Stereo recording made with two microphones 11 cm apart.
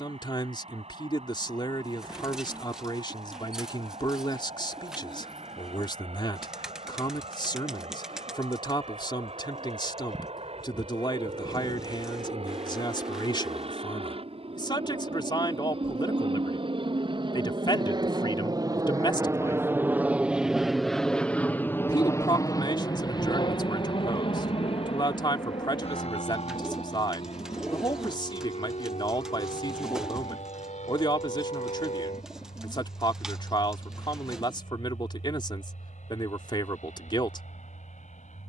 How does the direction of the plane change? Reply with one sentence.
In this clip you hear the plane travel towards the left.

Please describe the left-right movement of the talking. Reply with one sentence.
You can hear the talking stay in one place.